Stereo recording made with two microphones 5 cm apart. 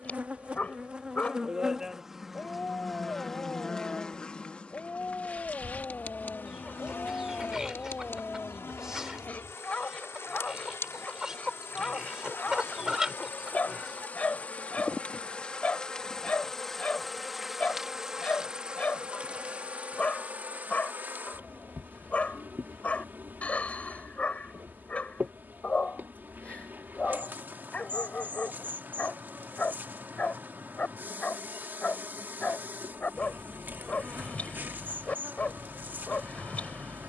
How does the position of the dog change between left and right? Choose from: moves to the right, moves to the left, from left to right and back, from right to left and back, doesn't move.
doesn't move.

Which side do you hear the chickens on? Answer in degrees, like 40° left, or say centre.
10° right.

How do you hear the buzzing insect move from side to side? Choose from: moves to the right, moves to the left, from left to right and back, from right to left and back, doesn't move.
from right to left and back.